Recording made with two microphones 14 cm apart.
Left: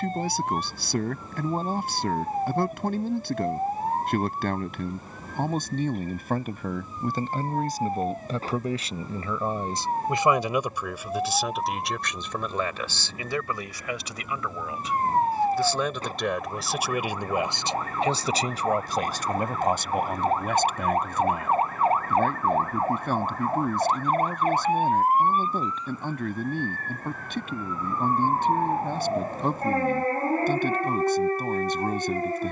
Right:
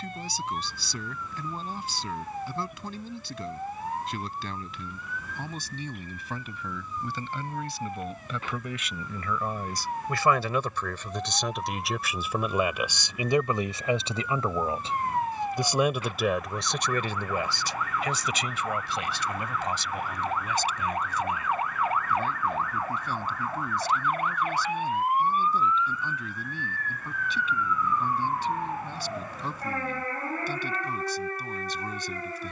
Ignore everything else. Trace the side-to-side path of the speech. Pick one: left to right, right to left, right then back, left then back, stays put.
right then back.